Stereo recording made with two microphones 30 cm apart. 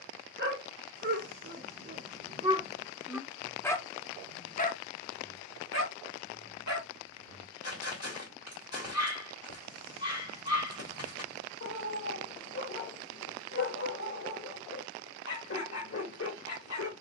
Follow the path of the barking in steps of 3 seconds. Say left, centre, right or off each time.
right, left, left, left, left, left.